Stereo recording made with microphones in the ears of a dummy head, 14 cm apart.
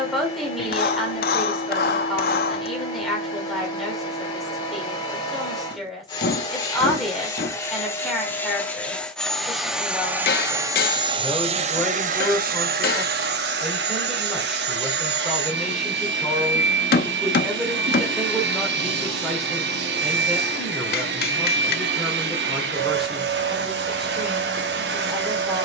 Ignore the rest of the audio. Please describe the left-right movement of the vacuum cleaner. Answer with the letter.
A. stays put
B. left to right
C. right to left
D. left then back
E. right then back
B.